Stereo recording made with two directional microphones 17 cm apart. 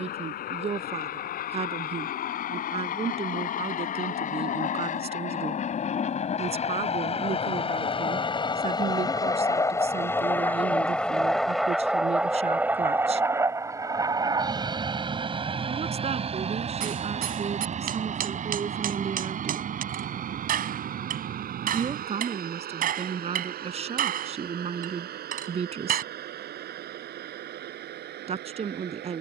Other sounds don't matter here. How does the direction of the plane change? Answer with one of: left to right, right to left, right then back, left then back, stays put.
left to right.